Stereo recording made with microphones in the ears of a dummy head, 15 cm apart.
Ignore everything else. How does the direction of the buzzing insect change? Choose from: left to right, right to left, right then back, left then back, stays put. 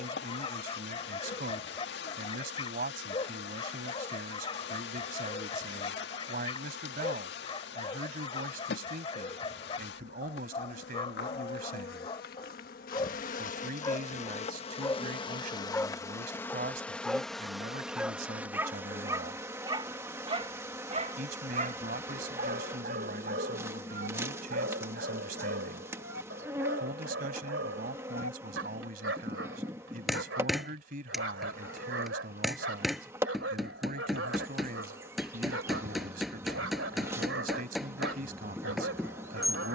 left to right.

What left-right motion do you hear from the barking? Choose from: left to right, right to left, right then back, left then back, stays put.
left to right.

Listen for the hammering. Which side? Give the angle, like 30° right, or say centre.
centre.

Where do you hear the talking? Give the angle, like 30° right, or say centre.
60° right.